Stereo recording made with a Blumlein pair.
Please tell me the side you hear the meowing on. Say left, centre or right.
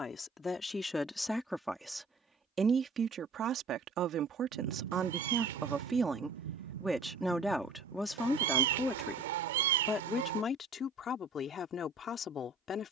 right.